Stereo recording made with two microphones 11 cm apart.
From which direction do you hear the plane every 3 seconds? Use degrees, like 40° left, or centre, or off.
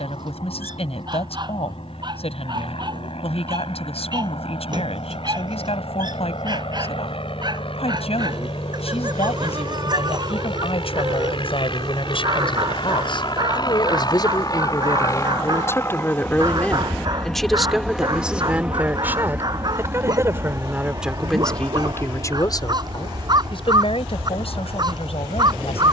80° left, 80° left, 70° left, 60° left, 50° left, 20° left, 20° right, 40° right, 50° right.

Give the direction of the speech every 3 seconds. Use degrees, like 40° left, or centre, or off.
80° left, 80° left, 80° left, 70° left, 50° left, 20° left, 20° right, 30° left, 70° left.